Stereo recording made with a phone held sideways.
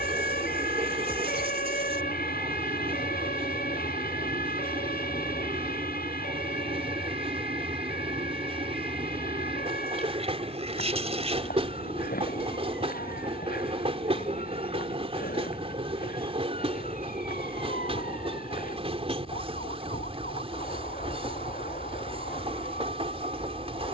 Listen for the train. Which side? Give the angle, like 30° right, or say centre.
40° right.